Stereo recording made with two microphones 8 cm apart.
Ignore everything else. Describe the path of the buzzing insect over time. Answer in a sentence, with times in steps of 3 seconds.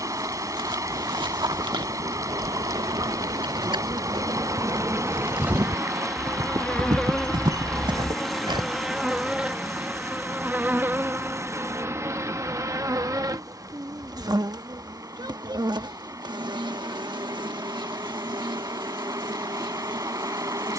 You can hear the buzzing insect on the right from 0 s, in the centre from 6 s and on the right from 9 s.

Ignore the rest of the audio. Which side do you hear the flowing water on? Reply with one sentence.
In this clip you hear the flowing water on the right.